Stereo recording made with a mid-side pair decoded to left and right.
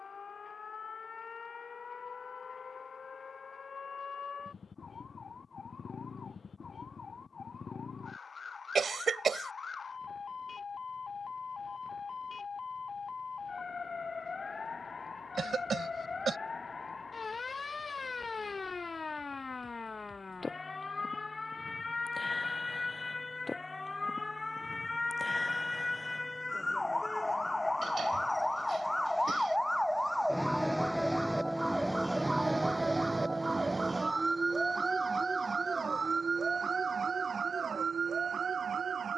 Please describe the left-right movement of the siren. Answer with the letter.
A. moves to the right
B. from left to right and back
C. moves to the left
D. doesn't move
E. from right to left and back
A.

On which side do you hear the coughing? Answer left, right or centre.
right.